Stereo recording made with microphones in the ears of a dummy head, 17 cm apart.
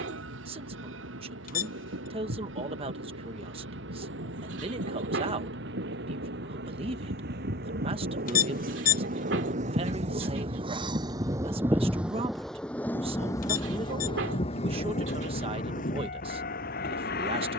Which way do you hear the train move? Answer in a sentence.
In this clip you hear the train go from the right side to the left.